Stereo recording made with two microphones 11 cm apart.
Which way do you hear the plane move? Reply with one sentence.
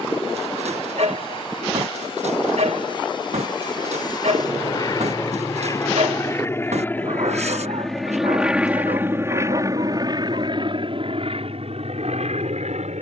In this clip you hear the plane move from left to right.